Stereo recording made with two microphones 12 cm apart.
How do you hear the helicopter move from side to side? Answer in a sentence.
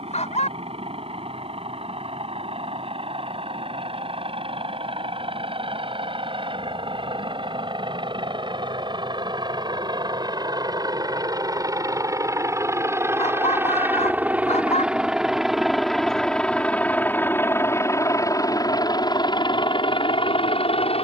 In this clip you hear the helicopter move to the left.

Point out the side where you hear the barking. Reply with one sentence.
You can hear the barking on the left.